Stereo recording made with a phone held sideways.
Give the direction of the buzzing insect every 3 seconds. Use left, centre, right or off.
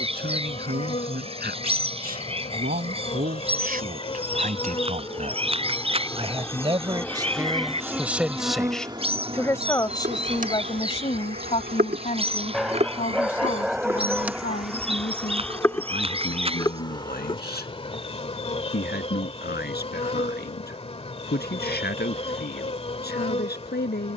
left, left, centre, right, right, left, left, left.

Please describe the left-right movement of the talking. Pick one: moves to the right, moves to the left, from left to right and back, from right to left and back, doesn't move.
moves to the left.